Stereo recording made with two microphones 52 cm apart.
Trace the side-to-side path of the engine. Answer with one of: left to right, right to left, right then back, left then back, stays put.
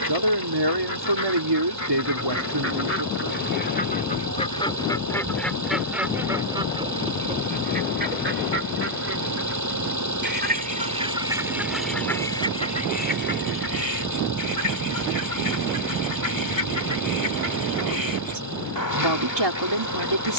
stays put.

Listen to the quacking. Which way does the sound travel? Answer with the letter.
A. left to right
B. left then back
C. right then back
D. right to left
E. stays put
C.